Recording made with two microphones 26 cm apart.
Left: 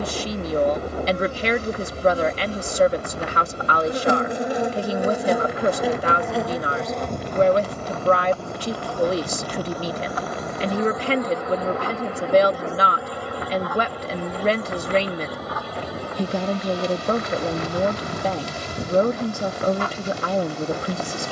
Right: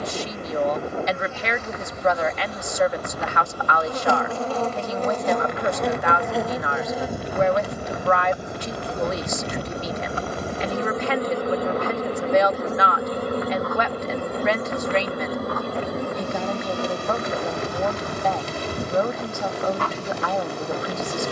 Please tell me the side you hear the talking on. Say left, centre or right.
left.